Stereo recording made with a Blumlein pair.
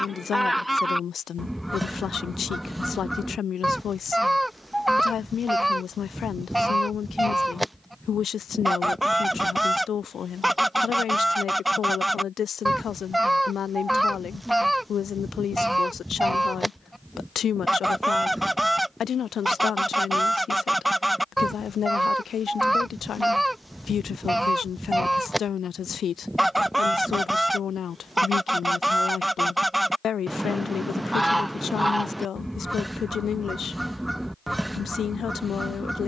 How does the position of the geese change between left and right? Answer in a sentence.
In this clip you hear the geese stay put.